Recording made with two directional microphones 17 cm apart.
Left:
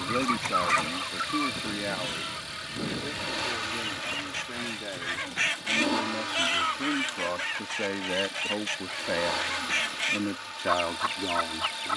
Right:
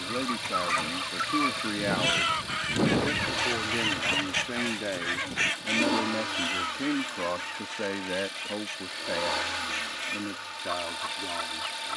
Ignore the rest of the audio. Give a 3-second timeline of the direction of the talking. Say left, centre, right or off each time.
centre, right, centre, left.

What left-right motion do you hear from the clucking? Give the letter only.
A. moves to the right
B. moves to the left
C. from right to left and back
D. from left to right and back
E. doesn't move
D.